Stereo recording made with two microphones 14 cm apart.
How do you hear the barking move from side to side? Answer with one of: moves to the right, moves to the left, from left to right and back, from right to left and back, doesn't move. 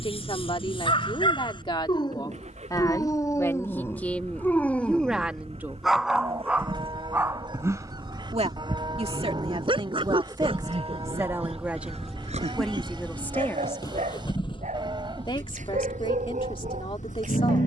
moves to the right.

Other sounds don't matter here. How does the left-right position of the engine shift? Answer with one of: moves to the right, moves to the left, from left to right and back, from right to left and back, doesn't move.
moves to the left.